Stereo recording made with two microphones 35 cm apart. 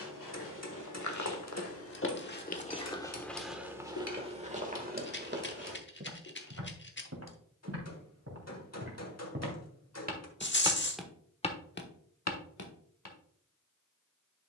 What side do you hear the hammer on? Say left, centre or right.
left.